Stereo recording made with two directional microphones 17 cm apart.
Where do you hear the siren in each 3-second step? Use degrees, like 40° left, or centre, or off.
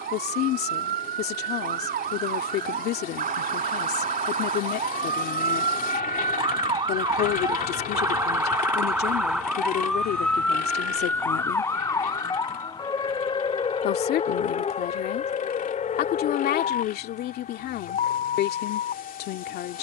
60° right, 40° right, 20° right, 10° left, 30° left, 40° left, 50° left.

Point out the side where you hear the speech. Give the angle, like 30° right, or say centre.
70° left.